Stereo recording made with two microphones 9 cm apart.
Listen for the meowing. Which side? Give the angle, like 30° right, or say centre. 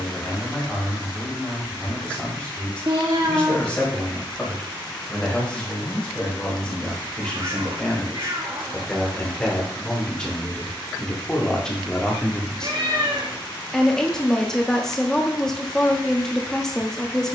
60° right.